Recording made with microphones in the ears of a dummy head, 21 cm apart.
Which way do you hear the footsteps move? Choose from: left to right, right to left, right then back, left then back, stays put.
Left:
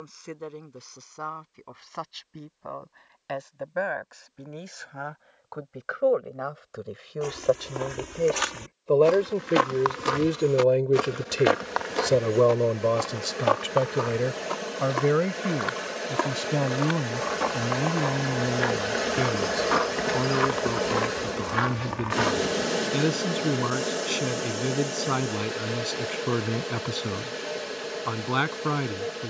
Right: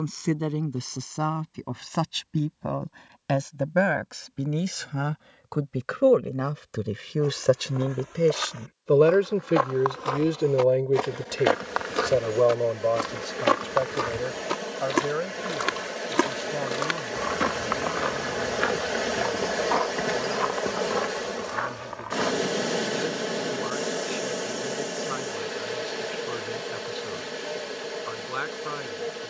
right then back.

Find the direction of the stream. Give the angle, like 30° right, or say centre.
centre.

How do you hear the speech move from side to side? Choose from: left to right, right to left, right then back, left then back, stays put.
right to left.